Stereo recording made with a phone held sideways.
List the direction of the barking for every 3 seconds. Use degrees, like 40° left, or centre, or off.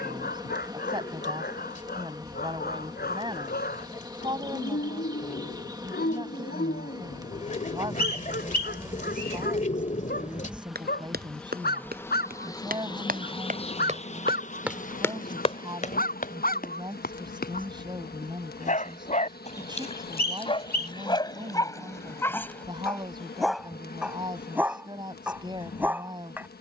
80° left, 80° left, 80° left, 80° left, 80° left, 70° left, 40° left, 20° left, 10° right.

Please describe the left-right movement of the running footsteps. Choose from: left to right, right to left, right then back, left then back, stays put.
right to left.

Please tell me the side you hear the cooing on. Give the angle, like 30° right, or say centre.
50° left.